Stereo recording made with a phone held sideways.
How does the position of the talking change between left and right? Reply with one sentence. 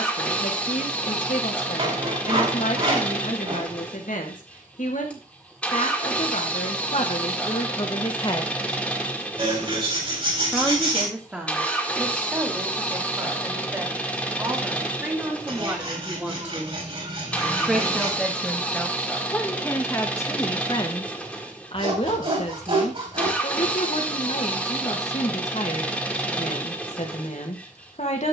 You can hear the talking go right and come back.